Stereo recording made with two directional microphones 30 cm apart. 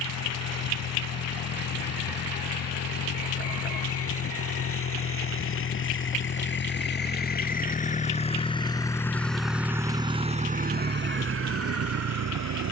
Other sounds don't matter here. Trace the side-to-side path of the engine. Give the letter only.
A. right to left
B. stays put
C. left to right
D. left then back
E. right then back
C.